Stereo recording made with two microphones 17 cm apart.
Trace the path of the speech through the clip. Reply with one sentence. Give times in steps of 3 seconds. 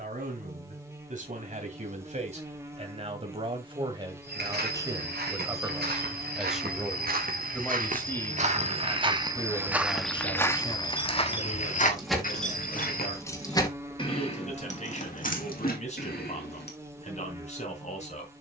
You can hear the speech on the right from 0 s, in the centre from 6 s and on the left from 9 s.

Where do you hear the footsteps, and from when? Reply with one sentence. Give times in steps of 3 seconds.
You can hear the footsteps not at all from 0 s, on the right from 3 s, in the centre from 9 s, on the left from 12 s and not at all from 15 s.